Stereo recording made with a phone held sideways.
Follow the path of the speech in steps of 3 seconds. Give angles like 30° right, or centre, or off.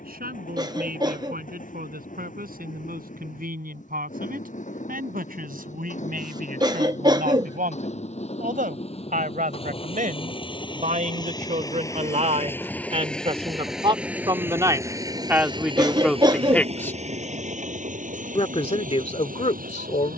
80° right, 70° right, 70° right, 60° right, 40° right, centre, 50° left.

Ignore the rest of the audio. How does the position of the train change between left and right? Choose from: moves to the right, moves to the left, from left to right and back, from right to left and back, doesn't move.
moves to the right.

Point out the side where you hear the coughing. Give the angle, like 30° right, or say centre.
30° right.